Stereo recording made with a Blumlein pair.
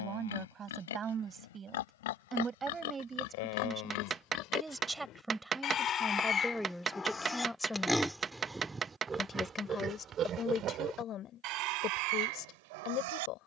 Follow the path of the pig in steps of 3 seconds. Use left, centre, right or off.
left, left, centre, right, right.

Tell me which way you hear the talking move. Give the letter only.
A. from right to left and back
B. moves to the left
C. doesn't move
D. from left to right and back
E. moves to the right
B.